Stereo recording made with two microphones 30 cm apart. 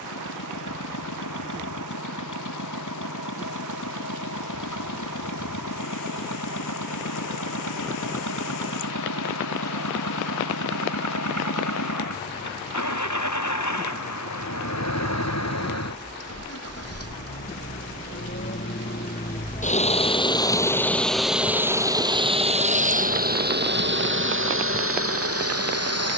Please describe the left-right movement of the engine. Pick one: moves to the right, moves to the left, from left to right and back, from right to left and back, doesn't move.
moves to the right.